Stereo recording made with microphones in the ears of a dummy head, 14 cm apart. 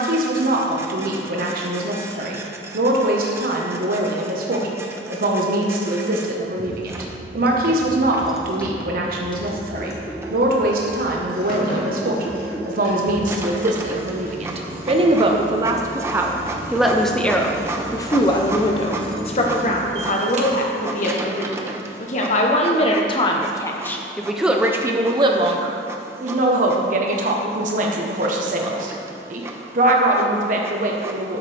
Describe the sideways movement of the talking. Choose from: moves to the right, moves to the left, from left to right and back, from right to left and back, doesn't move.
from right to left and back.